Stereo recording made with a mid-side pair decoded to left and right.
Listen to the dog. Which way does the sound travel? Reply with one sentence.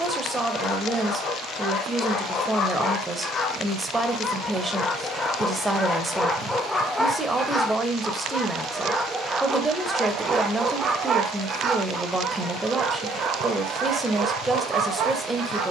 In this clip you hear the dog go from the left side to the right.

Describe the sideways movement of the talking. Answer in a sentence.
You can hear the talking stay in one place.